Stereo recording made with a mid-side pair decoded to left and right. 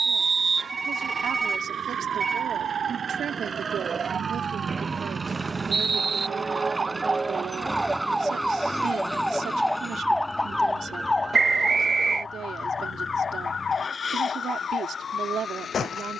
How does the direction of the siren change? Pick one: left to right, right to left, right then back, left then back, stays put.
right to left.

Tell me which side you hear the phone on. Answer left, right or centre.
right.